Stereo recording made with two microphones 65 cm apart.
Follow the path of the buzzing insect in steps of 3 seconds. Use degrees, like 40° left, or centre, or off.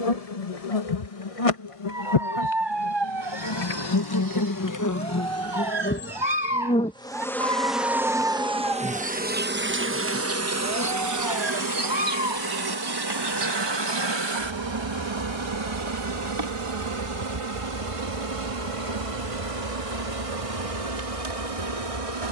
50° left, 30° left, centre, 20° right, 40° right, 40° right, 50° right, 50° right.